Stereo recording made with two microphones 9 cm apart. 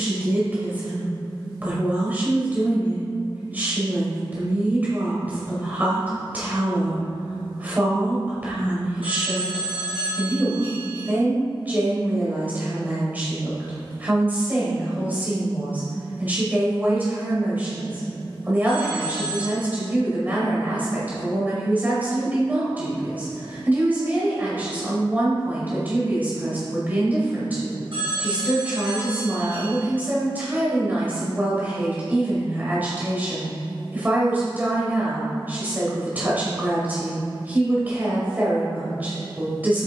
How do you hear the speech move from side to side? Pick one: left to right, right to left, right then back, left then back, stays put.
stays put.